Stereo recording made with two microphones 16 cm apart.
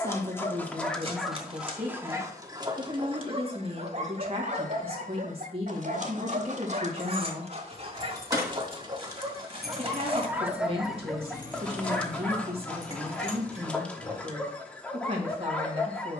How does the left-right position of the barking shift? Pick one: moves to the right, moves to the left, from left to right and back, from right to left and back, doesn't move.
from left to right and back.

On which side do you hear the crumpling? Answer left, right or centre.
right.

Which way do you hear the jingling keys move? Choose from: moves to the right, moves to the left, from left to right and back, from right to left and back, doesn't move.
moves to the left.